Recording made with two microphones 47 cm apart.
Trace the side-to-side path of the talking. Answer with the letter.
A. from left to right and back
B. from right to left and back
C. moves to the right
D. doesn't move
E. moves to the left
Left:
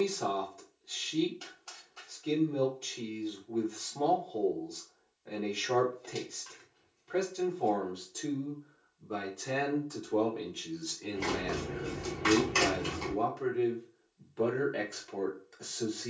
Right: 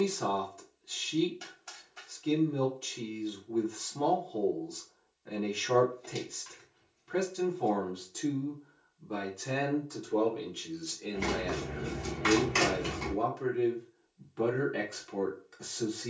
B.